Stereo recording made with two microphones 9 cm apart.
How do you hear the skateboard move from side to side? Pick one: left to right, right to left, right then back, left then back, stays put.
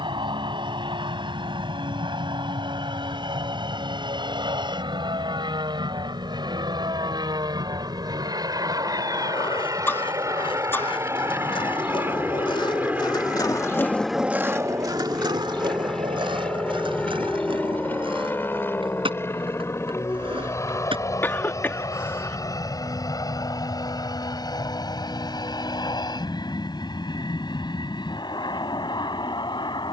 left to right.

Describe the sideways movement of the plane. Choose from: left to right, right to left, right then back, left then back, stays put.
right to left.